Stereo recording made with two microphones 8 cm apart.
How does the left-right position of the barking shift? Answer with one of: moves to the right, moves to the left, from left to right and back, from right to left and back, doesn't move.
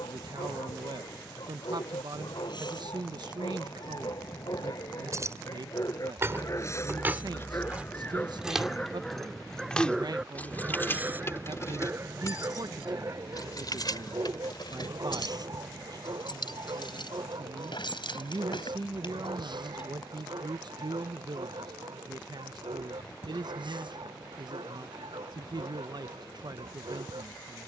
moves to the right.